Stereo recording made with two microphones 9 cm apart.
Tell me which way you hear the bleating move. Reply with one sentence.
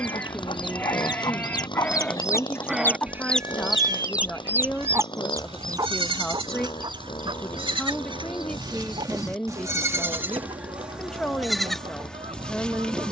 You can hear the bleating move from left to right and back again.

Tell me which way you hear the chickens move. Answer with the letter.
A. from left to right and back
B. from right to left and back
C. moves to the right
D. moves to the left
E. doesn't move
C.